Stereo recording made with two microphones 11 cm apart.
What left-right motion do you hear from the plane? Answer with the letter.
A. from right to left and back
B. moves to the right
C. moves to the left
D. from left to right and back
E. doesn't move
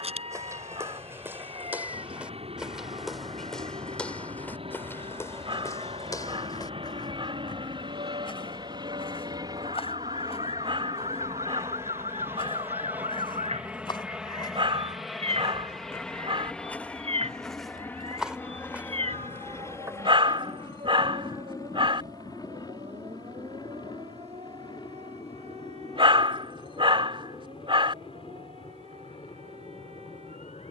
C.